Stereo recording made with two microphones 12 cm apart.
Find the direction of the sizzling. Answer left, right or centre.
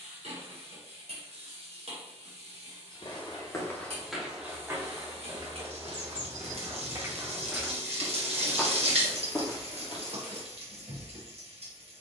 right.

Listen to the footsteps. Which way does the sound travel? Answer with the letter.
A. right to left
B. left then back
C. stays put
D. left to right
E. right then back
E.